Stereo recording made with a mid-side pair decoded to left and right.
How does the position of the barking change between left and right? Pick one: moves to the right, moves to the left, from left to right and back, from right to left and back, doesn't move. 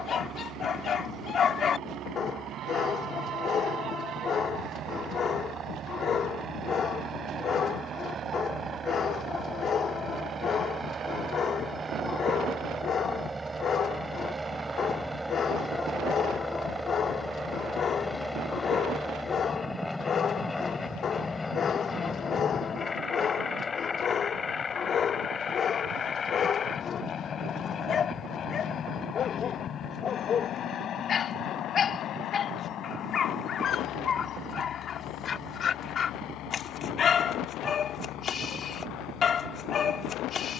doesn't move.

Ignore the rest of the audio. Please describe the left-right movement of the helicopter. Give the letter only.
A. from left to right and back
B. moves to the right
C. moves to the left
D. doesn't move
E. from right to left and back
C.